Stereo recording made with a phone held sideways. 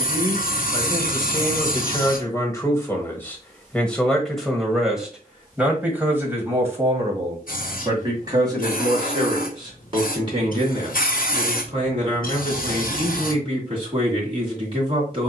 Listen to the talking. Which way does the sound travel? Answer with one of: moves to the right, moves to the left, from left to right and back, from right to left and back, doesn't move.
moves to the right.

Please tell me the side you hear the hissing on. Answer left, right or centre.
left.